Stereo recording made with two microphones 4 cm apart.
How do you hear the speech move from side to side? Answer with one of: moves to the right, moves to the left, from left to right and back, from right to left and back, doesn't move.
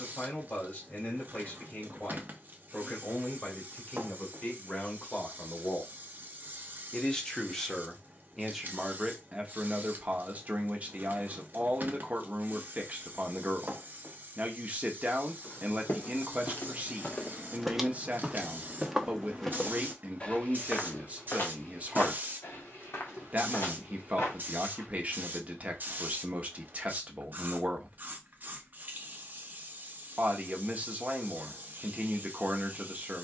moves to the right.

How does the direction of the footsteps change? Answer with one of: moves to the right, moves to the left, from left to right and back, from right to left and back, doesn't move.
from left to right and back.